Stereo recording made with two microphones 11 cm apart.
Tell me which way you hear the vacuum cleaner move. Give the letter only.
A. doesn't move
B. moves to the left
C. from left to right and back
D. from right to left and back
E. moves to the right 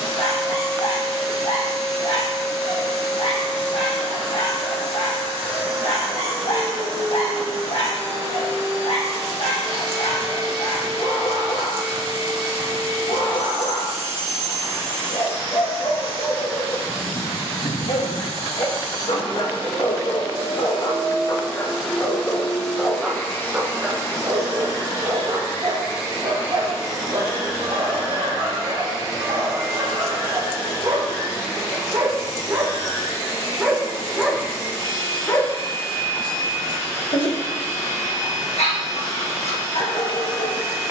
B.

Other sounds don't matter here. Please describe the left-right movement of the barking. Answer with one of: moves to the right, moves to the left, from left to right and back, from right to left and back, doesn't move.
from left to right and back.